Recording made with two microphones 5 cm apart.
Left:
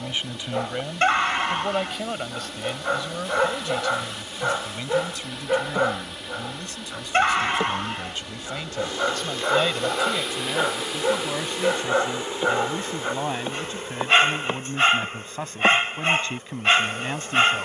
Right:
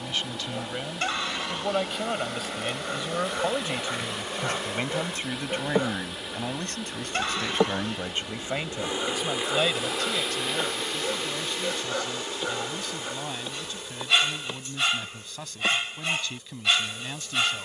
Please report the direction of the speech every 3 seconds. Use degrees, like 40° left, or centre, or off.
centre, 30° right, 40° right, 20° left, 40° left, 40° left.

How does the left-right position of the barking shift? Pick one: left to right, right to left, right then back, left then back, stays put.
stays put.